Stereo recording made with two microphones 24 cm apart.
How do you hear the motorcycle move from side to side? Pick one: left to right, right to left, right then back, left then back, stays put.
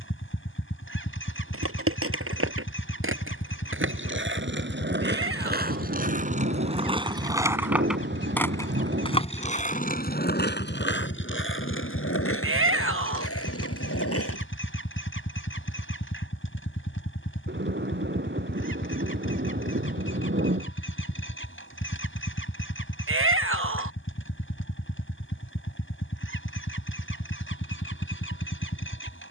stays put.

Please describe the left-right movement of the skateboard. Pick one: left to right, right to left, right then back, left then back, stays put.
right to left.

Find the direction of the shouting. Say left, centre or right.
right.